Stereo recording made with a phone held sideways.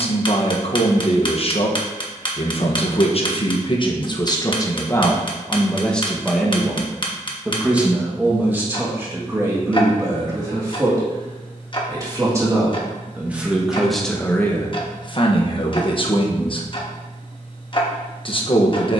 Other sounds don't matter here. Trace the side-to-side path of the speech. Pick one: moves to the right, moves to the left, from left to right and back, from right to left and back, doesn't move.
from left to right and back.